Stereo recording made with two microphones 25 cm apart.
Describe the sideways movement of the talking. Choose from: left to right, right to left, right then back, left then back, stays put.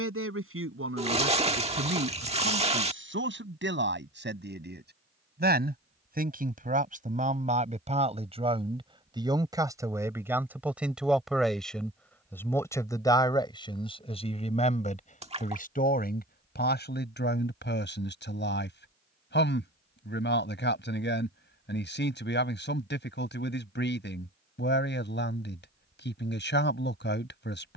right to left.